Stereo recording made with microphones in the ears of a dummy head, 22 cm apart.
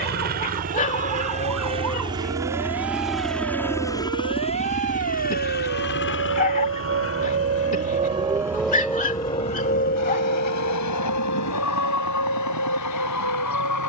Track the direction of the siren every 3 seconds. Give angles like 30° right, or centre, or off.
80° right, 70° right, 30° right, 40° left, 70° left.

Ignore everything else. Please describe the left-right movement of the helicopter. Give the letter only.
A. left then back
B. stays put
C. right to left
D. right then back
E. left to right
C.